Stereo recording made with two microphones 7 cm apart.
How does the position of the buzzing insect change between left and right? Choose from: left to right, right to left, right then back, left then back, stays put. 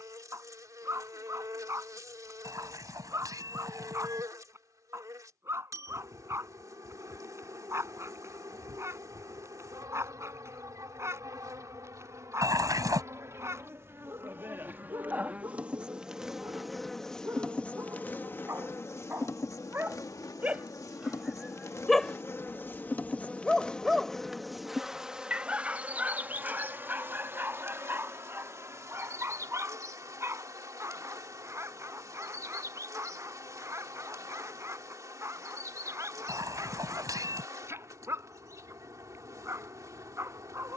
left then back.